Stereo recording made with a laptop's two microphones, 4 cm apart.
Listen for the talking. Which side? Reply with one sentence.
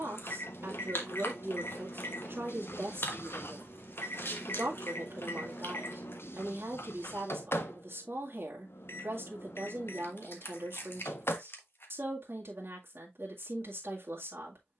You can hear the talking on the right.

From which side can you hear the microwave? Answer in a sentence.
You can hear the microwave on the left.